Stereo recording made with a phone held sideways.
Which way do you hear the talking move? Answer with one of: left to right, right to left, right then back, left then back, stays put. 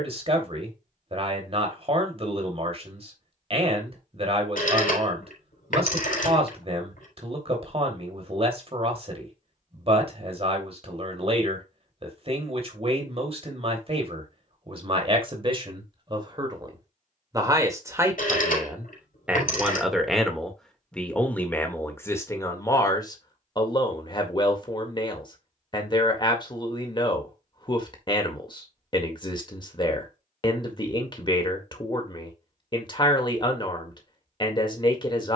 right to left.